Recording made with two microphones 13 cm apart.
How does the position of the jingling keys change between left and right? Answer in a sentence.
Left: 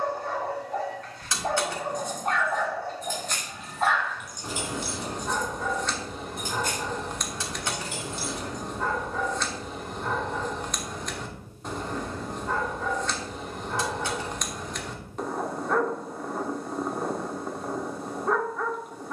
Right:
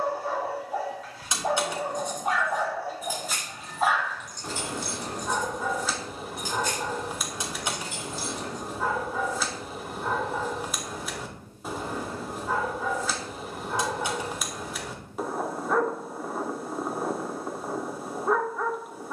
You can hear the jingling keys travel towards the left.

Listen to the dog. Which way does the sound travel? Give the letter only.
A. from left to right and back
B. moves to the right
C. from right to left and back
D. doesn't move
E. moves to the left
D.